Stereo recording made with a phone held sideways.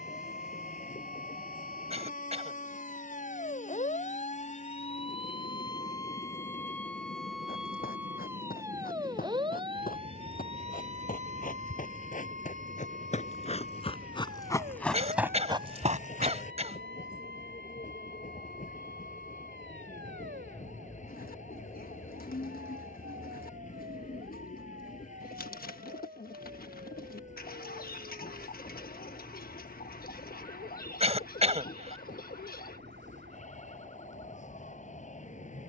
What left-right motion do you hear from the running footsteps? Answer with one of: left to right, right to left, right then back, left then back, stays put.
left to right.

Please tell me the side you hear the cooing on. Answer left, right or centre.
left.